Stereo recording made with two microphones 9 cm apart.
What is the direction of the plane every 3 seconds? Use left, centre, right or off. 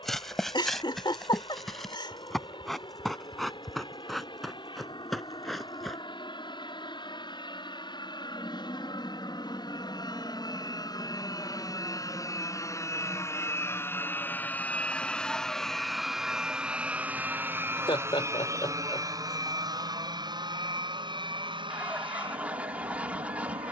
left, left, left, left, left, centre, right, right.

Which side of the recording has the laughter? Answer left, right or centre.
left.